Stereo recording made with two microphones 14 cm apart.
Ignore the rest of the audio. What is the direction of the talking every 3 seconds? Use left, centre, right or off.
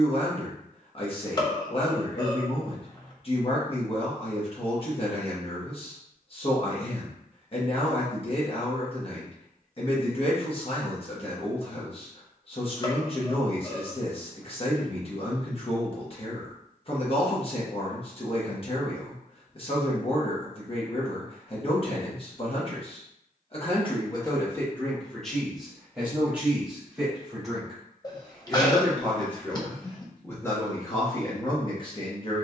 left, left, left, left, left, left, left, left, centre, centre, left.